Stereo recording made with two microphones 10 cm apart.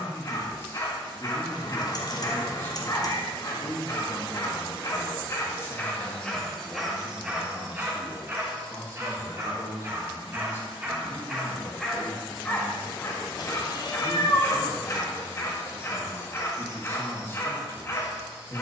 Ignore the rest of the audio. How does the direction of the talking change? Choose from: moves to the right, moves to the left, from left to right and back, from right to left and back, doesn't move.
doesn't move.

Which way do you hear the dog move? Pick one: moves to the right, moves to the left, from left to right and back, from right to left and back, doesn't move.
from left to right and back.